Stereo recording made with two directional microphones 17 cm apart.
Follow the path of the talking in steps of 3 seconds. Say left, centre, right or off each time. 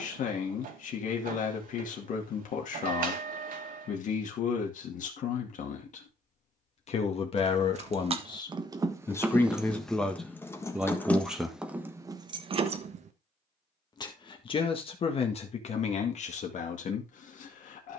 left, left, left, centre, left, left.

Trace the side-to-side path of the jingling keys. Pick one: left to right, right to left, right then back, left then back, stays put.
left then back.